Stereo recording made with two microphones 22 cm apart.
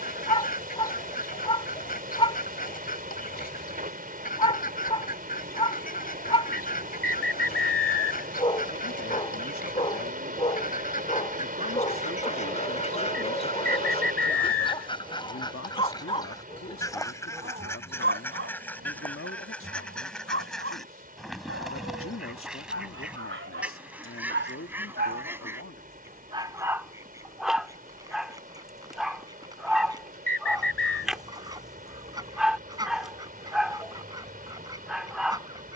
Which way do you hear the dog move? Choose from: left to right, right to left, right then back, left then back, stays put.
right then back.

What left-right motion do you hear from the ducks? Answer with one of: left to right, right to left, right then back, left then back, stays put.
left to right.